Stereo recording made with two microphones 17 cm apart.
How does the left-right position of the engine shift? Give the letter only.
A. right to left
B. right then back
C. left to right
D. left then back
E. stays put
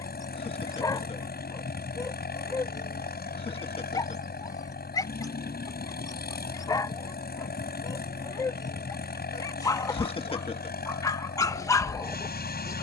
E.